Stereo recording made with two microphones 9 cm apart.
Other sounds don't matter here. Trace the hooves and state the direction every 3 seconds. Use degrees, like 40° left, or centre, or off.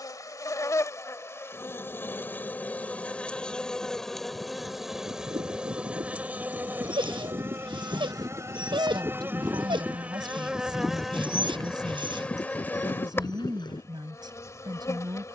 off, 60° right, 50° right, centre, 40° left.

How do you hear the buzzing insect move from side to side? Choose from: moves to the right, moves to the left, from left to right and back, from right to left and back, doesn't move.
from left to right and back.